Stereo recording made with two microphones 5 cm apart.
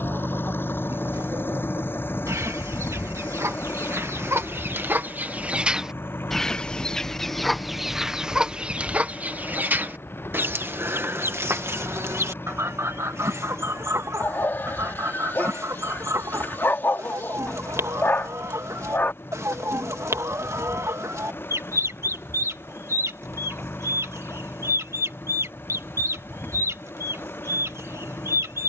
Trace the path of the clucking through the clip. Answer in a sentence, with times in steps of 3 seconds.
In this clip you hear the clucking on the right from 0 s, in the centre from 6 s and on the right from 9 s.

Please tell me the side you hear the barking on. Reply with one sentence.
You can hear the barking on the left.